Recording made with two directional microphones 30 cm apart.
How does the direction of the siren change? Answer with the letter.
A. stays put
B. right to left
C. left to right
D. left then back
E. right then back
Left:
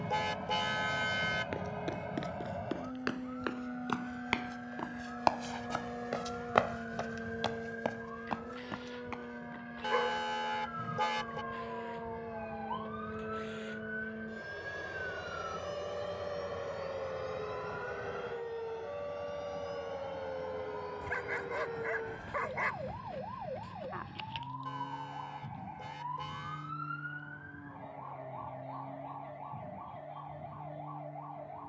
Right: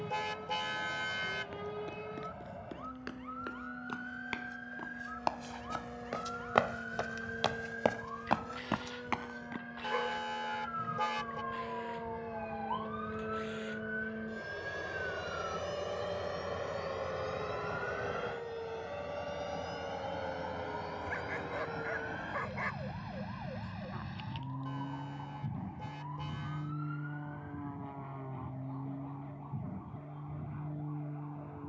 B.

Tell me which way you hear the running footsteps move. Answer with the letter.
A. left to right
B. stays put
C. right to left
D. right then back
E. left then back
A.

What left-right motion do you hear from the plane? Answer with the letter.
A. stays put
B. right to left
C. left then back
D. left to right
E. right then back
D.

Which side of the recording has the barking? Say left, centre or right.
left.